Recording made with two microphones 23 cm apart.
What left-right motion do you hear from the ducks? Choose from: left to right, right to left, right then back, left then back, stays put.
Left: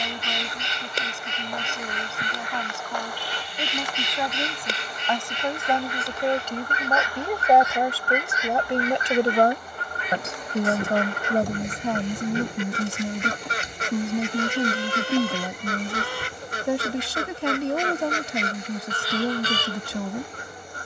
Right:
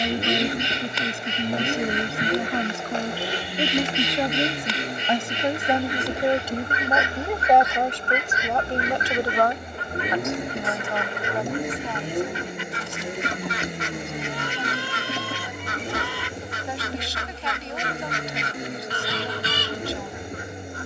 stays put.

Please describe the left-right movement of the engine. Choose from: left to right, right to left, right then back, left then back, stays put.
stays put.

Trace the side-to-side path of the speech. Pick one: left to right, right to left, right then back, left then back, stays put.
right to left.